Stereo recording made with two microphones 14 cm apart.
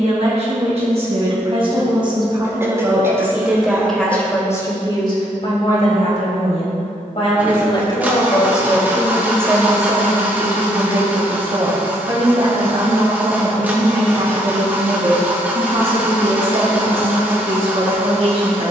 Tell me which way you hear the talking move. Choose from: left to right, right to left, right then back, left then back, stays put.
left then back.